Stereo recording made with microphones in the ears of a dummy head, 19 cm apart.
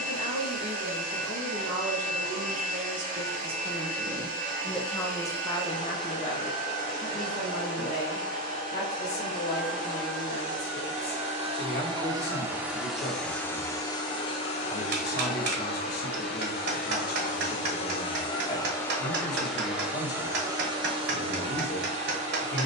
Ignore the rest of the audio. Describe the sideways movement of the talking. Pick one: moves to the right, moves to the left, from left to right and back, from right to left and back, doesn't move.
moves to the left.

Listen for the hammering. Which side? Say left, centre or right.
right.